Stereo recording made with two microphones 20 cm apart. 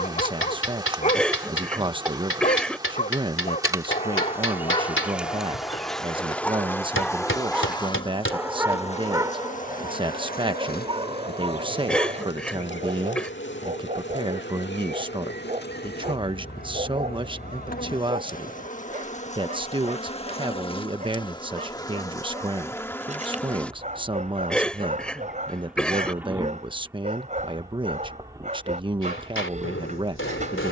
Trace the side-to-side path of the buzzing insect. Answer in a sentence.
You can hear the buzzing insect move from right to left and back again.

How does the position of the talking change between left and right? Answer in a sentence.
In this clip you hear the talking stay in one place.